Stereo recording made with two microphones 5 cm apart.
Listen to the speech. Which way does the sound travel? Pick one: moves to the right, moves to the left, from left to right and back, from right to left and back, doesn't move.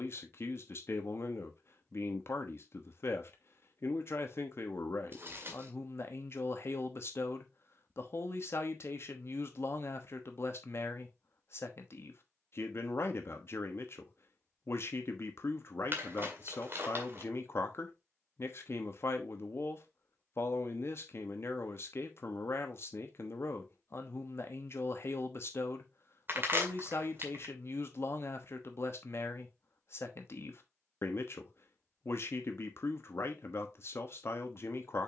doesn't move.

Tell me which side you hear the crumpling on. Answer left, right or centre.
right.